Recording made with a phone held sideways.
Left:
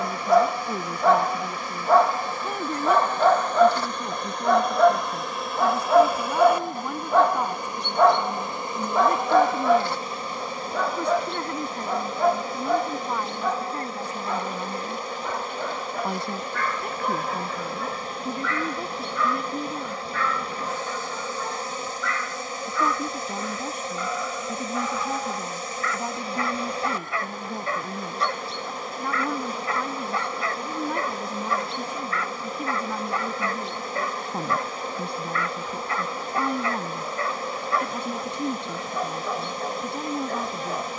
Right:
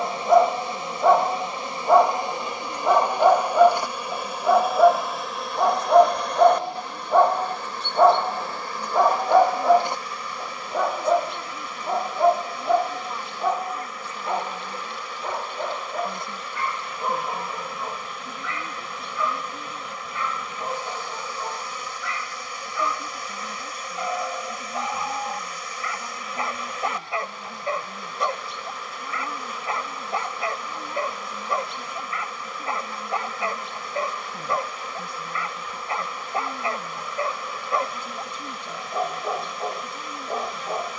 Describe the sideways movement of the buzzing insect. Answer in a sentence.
In this clip you hear the buzzing insect move to the left.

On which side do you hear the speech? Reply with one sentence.
You can hear the speech on the left.